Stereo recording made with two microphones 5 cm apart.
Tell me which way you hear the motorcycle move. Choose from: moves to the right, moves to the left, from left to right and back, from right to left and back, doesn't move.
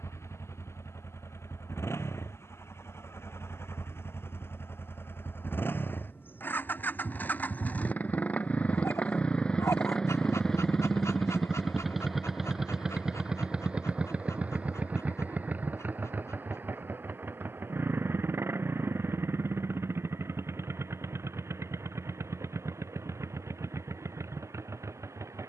moves to the right.